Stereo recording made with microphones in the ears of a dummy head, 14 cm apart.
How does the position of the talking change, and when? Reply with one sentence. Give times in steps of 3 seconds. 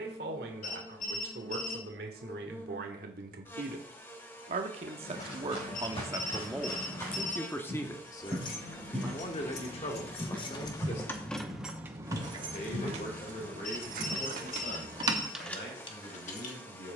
In this clip you hear the talking on the right from 0 s, in the centre from 6 s and on the left from 9 s.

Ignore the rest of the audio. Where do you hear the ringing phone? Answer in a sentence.
You can hear the ringing phone on the left.